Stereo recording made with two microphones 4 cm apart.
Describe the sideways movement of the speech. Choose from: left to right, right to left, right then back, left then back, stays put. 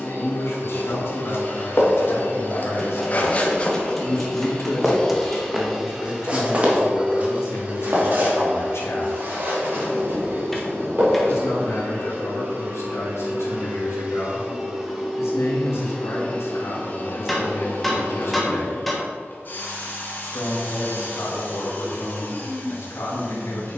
stays put.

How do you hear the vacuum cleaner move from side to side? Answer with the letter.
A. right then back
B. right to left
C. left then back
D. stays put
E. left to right
A.